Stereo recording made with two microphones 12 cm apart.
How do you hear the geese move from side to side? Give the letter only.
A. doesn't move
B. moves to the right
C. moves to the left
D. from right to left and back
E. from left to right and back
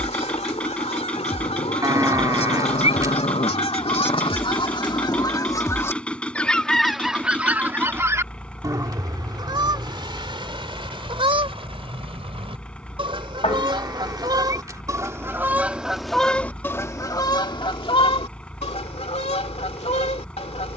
E.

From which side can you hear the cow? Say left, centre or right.
right.